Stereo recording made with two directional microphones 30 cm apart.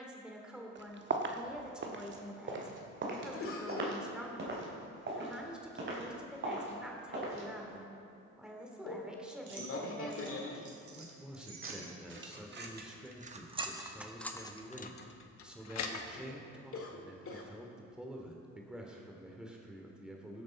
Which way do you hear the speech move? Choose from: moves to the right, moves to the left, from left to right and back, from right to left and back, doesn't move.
doesn't move.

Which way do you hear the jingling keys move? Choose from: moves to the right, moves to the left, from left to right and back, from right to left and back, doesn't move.
moves to the left.